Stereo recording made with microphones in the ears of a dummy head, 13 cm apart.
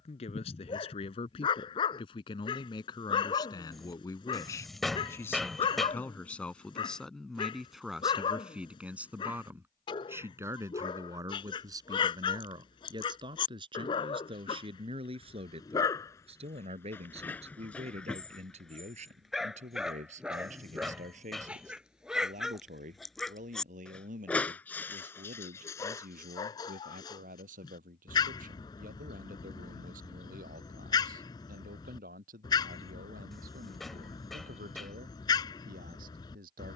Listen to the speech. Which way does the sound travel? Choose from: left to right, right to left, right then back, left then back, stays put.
left to right.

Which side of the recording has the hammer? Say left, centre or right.
centre.